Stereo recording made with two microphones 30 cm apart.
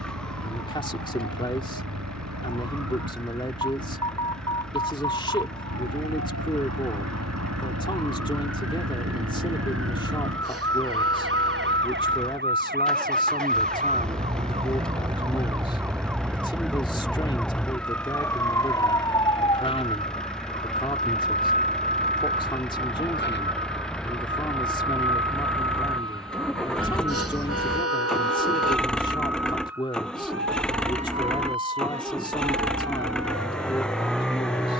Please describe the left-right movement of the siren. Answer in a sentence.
You can hear the siren move from right to left.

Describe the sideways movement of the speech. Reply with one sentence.
You can hear the speech stay put.